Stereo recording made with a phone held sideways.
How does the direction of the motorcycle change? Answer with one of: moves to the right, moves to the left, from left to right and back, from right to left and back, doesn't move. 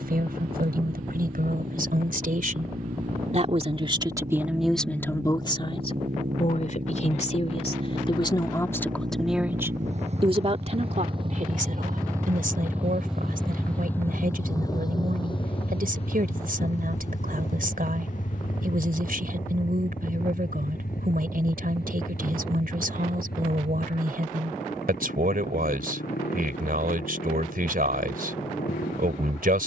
moves to the left.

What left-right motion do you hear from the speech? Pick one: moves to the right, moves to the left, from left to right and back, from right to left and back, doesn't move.
from right to left and back.